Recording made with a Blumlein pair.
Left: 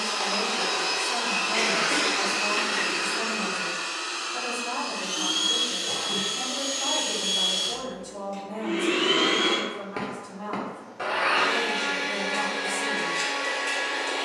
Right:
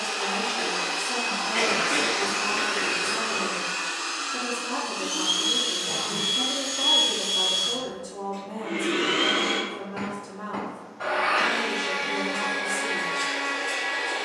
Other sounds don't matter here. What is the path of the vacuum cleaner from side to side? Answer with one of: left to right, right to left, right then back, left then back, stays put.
right then back.